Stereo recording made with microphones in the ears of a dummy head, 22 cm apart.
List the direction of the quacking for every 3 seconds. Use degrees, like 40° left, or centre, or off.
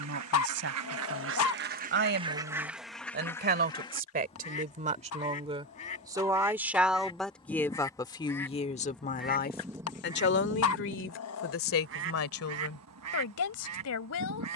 40° right, 20° left, 20° left, 20° right, 70° right.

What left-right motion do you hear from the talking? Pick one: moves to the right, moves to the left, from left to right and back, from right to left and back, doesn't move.
moves to the left.